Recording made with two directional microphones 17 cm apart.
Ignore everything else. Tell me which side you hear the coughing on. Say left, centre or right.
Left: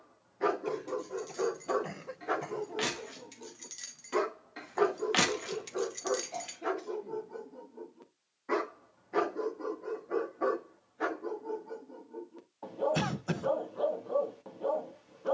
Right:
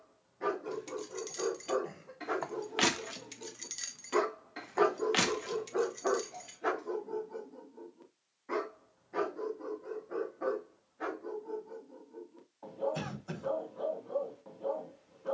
left.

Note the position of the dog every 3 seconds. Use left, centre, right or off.
left, centre, centre, left, left.